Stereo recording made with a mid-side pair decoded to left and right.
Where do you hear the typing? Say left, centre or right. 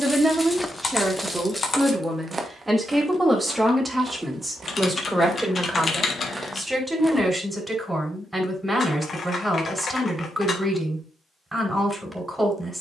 left.